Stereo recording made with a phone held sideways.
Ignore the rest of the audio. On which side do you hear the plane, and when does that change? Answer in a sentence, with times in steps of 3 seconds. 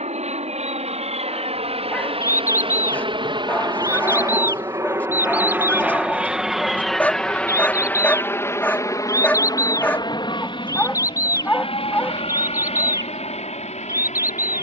You can hear the plane on the right from 0 s, in the centre from 6 s and on the left from 9 s.